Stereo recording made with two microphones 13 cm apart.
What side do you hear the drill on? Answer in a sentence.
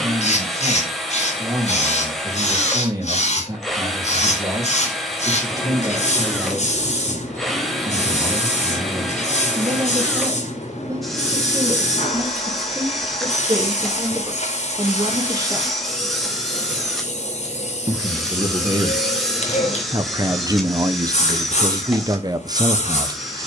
In this clip you hear the drill in the centre.